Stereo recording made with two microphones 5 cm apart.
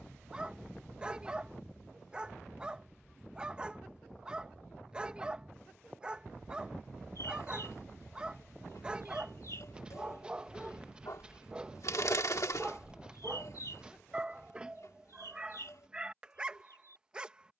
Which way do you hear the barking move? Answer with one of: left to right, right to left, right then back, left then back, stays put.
stays put.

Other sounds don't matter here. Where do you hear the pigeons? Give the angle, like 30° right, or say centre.
70° left.